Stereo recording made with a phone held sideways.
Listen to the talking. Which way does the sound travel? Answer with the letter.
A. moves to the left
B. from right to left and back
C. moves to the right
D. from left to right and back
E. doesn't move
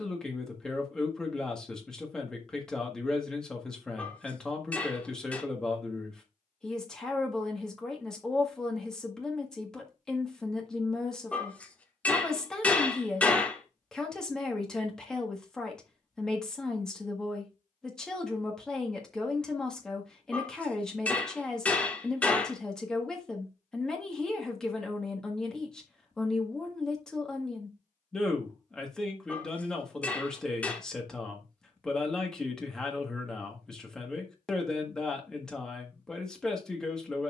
E.